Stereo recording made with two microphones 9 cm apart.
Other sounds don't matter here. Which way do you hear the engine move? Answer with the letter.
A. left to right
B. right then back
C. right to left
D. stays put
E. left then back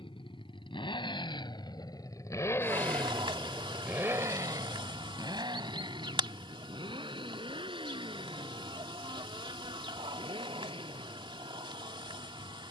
A.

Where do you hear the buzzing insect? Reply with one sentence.
You can hear the buzzing insect on the right.